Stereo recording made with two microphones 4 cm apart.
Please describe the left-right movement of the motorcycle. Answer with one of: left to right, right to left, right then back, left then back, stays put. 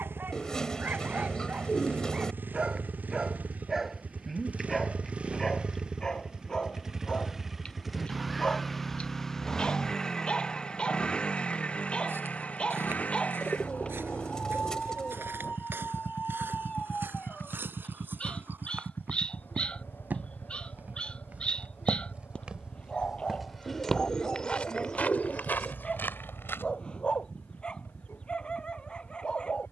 right to left.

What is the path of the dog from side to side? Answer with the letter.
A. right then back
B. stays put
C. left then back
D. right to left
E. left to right
D.